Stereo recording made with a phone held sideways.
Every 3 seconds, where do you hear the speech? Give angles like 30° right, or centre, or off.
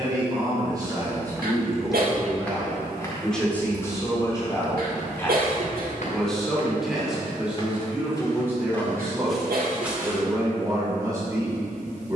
20° right, 20° left, 10° right, 20° right.